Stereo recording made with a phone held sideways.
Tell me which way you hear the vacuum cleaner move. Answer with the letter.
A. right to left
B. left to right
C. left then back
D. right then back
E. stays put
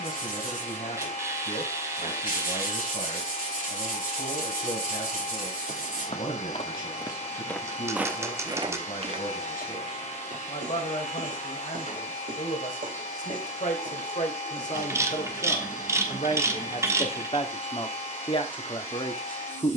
E.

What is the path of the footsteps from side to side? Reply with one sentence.
You can hear the footsteps go from the left side to the right.